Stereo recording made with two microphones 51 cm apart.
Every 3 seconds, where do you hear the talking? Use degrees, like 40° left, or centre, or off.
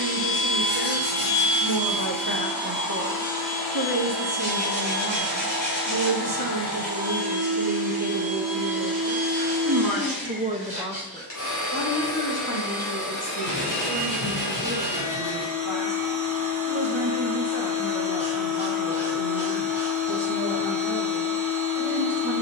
50° right, 50° right, 50° right, 10° right, 50° left, 70° left, 70° left, 70° left.